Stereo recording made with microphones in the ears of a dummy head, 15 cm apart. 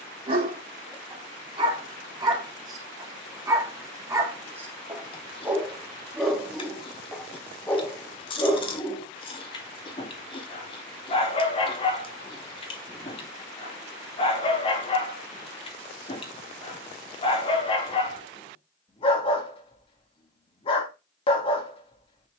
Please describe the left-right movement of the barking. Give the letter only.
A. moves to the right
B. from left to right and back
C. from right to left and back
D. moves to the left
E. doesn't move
D.